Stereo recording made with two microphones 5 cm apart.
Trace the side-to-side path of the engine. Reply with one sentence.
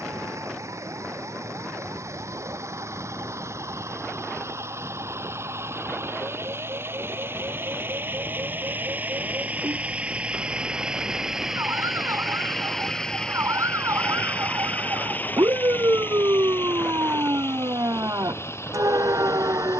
In this clip you hear the engine move to the left.